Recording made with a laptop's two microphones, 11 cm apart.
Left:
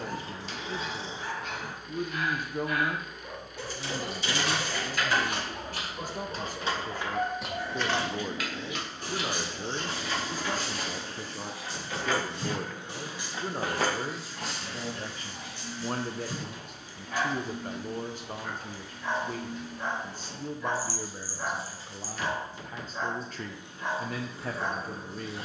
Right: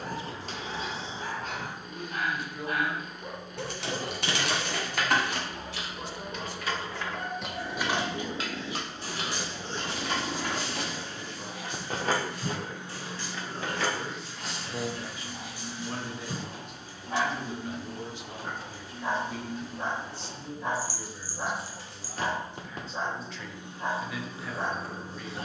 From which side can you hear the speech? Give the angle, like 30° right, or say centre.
50° left.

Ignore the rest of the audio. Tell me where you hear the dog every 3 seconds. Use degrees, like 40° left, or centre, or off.
40° right, centre, 40° left, 40° left, 10° left, 20° right, 30° right, 30° right, 30° right.